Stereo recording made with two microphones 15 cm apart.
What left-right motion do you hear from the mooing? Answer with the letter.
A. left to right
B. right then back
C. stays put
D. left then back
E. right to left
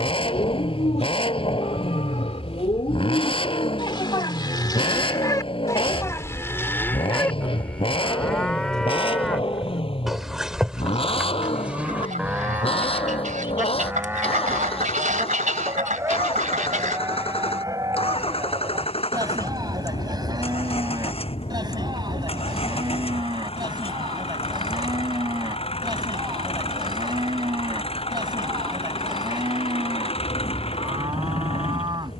A.